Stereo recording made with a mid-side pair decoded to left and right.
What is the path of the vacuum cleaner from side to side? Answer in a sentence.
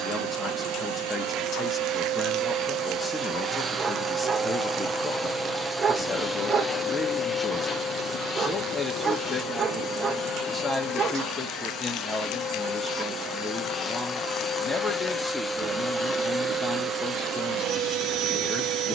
You can hear the vacuum cleaner go left and come back.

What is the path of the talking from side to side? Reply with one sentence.
You can hear the talking stay put.